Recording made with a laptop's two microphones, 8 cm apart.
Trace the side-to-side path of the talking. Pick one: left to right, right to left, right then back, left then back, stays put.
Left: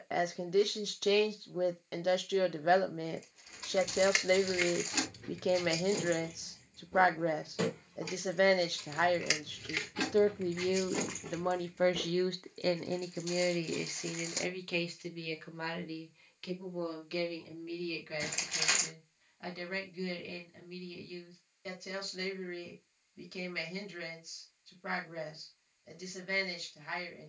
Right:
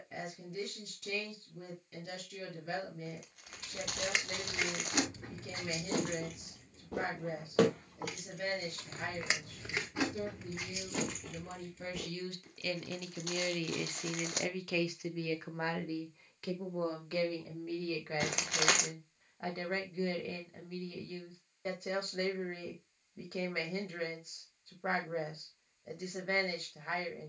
left to right.